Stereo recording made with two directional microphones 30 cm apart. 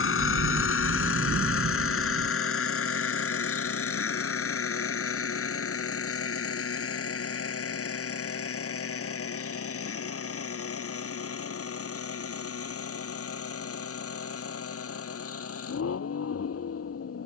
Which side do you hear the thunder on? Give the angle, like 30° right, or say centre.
40° right.